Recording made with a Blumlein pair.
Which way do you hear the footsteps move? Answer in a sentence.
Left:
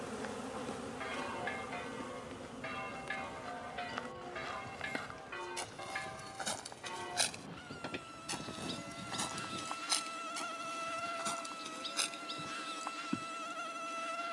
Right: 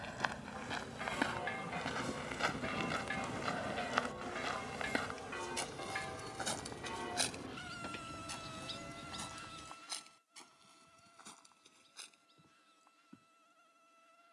You can hear the footsteps move from right to left.